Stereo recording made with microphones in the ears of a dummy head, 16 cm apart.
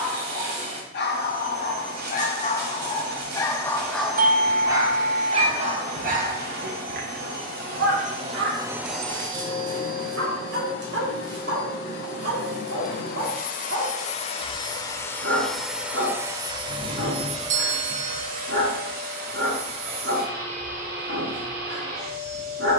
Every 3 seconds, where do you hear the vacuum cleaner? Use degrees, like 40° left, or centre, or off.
60° right, 60° right, 40° right, 50° left, 40° left, 20° right, 50° right, 50° right.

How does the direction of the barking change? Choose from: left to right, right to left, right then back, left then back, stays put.
left to right.